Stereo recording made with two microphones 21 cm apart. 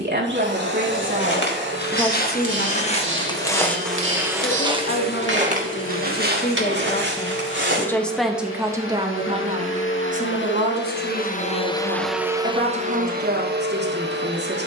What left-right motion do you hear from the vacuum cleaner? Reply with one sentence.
You can hear the vacuum cleaner go left and come back.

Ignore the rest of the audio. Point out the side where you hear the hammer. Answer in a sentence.
You can hear the hammer on the right.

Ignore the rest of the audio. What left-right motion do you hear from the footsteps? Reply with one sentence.
You can hear the footsteps move to the right.